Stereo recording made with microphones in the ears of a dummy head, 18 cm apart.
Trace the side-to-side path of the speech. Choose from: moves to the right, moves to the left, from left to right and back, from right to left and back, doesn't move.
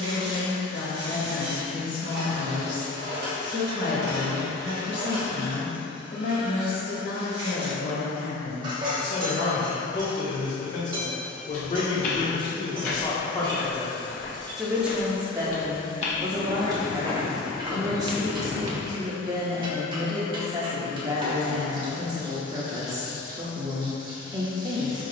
moves to the right.